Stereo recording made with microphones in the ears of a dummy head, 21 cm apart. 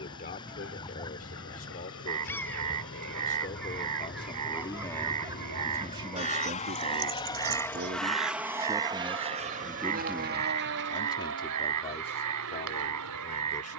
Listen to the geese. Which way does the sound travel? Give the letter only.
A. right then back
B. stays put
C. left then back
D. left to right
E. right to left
D.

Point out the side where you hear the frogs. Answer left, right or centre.
right.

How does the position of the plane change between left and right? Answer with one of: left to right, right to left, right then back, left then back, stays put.
left to right.